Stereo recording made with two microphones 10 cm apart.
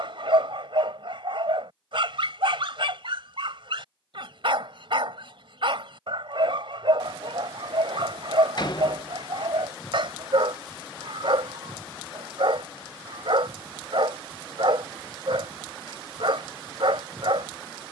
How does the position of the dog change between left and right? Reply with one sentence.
You can hear the dog stay put.